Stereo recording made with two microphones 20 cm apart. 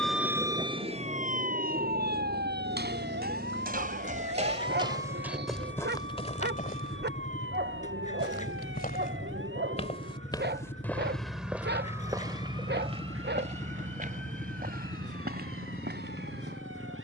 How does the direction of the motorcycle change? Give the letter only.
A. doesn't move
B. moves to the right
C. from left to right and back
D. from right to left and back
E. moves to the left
A.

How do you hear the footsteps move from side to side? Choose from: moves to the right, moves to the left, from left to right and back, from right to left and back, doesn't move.
from right to left and back.